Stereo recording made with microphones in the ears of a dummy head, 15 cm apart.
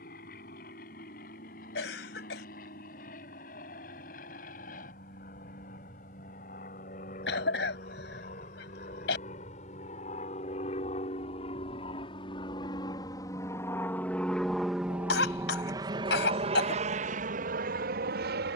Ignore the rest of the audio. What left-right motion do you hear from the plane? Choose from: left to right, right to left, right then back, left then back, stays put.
left to right.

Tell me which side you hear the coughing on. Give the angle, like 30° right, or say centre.
70° left.